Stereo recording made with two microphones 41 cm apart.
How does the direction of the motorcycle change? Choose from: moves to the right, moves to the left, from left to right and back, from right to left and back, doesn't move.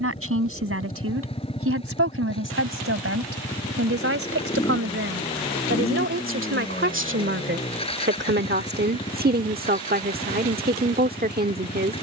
doesn't move.